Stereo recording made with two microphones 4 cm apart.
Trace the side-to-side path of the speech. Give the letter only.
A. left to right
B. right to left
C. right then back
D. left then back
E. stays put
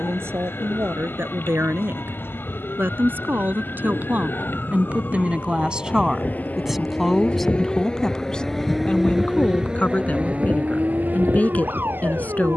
B.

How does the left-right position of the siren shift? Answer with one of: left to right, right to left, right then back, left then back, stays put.
left to right.